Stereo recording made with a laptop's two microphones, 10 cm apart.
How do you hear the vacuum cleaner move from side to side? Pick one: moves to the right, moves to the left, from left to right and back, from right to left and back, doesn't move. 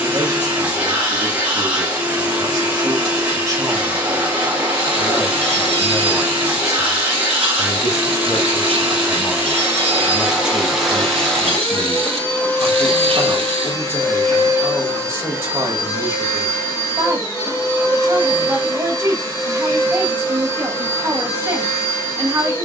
moves to the left.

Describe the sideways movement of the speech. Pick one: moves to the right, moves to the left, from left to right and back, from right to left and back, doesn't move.
from right to left and back.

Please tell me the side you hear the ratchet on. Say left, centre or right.
right.